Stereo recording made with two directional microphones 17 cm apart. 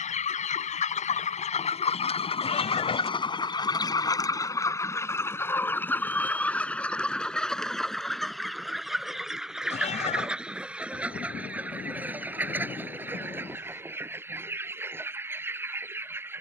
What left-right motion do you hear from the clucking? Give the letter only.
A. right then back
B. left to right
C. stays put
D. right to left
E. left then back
B.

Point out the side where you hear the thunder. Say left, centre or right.
left.